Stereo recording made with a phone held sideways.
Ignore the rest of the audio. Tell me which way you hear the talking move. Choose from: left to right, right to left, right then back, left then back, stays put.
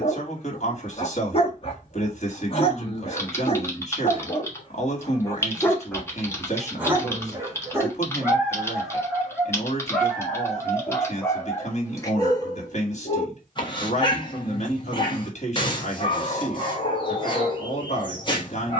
stays put.